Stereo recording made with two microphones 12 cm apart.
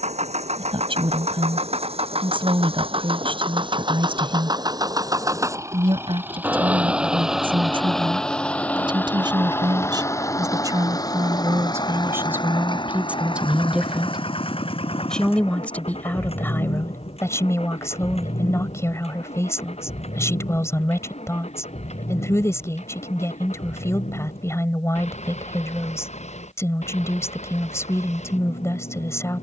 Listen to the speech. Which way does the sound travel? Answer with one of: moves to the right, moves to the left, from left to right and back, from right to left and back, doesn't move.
moves to the left.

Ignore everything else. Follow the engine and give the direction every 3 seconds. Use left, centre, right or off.
right, right, centre, left, left, left, left, left, left, left.